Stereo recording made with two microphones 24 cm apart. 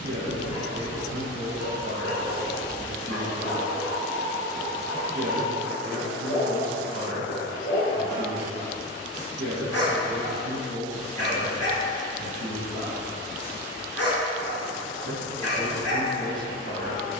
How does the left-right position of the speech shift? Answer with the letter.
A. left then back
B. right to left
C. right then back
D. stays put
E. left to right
D.